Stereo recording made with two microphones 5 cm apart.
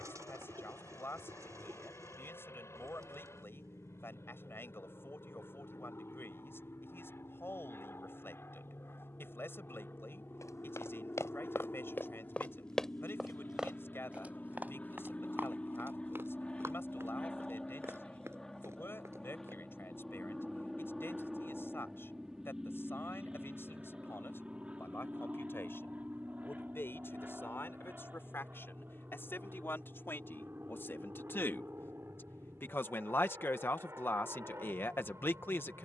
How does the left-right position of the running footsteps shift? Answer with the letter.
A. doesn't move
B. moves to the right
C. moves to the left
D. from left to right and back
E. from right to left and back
B.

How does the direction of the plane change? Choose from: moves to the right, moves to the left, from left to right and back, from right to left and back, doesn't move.
moves to the right.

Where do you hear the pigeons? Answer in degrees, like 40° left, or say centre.
80° right.